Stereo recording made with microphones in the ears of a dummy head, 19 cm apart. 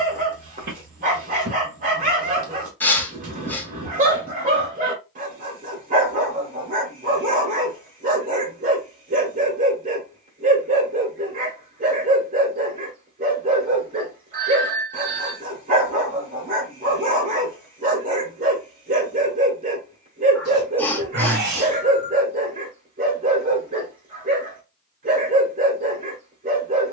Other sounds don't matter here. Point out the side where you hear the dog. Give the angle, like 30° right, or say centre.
40° right.